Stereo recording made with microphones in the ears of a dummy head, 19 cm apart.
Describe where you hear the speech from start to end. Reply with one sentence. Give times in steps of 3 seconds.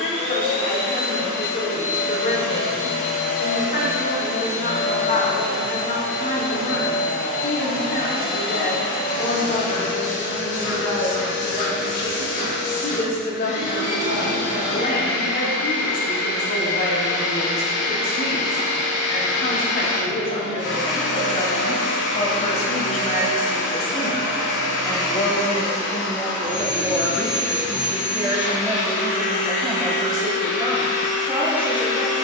You can hear the speech on the left from 0 s, in the centre from 24 s and on the right from 30 s.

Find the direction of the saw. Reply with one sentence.
You can hear the saw on the left.